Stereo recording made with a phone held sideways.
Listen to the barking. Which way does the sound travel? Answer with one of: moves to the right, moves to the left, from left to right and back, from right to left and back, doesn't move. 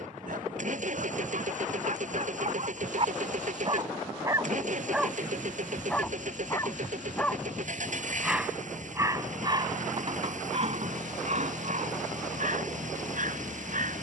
from right to left and back.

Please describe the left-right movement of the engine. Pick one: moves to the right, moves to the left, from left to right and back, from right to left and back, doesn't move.
doesn't move.